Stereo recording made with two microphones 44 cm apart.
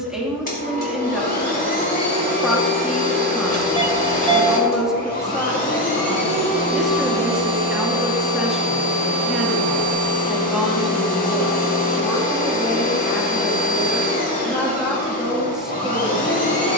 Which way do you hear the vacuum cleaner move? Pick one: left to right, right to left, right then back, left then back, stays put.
stays put.